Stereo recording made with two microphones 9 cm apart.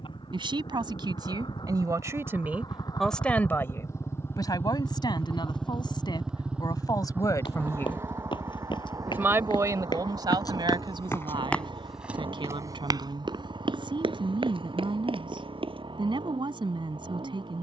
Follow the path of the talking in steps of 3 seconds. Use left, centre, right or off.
right, left, left, right, right, right.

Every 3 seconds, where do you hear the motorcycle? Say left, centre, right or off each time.
left, left, right, right, right, right.